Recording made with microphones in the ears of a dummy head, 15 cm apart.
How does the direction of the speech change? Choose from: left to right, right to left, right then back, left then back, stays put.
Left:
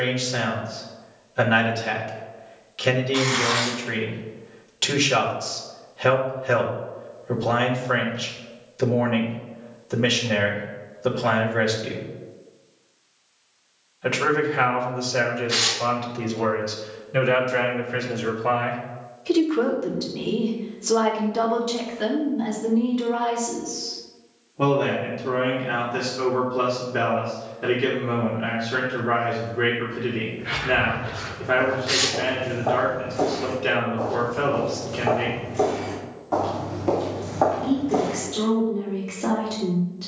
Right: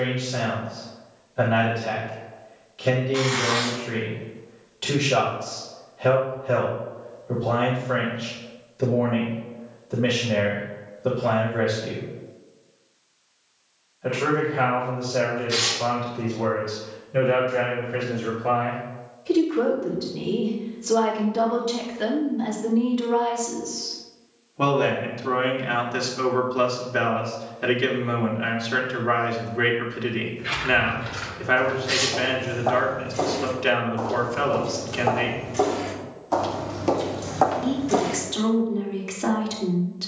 left to right.